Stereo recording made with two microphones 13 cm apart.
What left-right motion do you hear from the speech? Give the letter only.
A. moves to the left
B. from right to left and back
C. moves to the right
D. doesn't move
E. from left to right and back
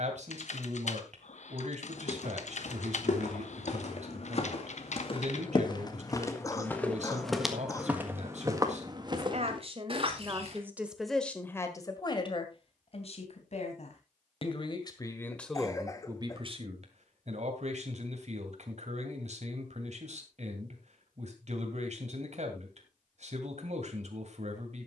B.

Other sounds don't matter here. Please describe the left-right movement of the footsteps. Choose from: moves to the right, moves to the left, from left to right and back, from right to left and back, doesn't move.
moves to the right.